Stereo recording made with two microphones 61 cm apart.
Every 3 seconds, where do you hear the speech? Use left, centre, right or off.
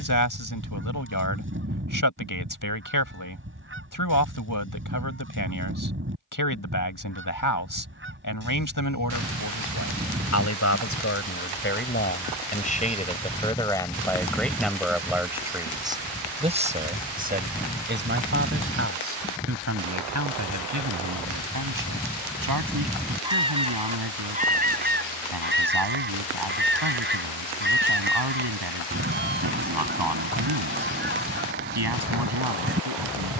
left, left, left, left, centre, centre, right, right, right, right, right.